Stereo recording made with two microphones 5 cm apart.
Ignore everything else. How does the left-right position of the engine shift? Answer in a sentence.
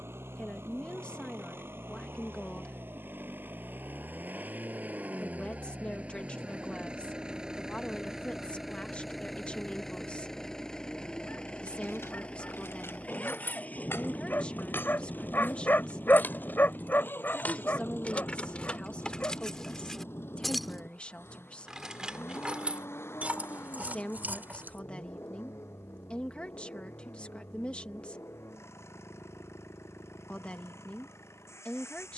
You can hear the engine travel towards the left.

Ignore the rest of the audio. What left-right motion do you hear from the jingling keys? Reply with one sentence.
In this clip you hear the jingling keys travel towards the right.